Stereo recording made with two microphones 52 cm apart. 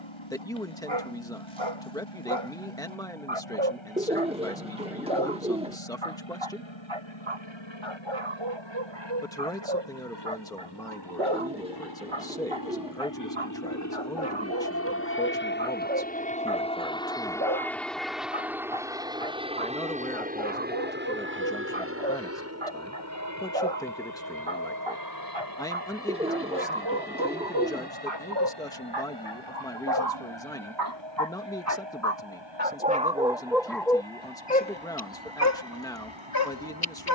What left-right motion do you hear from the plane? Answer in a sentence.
You can hear the plane travel towards the right.